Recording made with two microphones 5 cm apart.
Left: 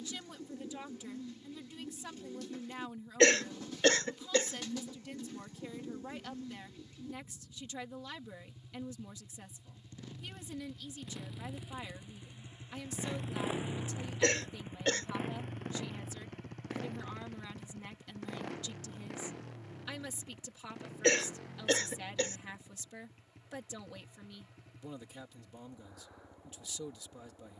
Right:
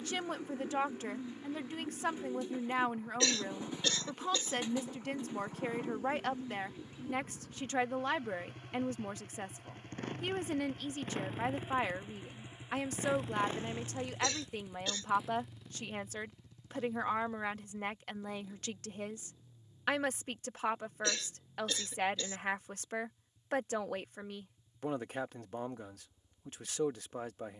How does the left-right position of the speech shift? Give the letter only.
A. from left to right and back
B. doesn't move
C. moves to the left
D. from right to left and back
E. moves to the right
B.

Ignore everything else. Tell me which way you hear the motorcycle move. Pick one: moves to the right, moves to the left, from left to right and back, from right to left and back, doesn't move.
moves to the left.